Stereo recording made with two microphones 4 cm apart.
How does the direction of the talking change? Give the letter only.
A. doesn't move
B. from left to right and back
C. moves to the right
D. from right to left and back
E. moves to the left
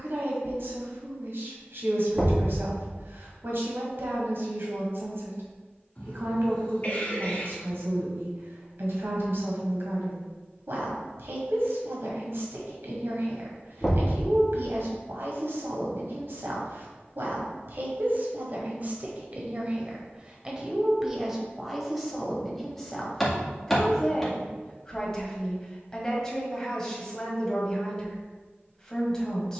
E.